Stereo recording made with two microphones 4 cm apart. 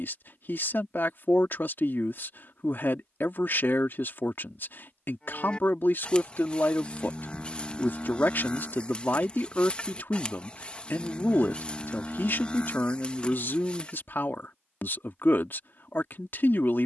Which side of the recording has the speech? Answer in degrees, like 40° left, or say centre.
50° left.